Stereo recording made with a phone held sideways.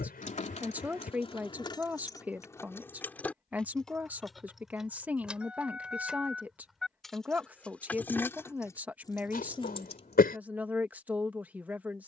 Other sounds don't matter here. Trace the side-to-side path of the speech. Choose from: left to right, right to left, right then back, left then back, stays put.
stays put.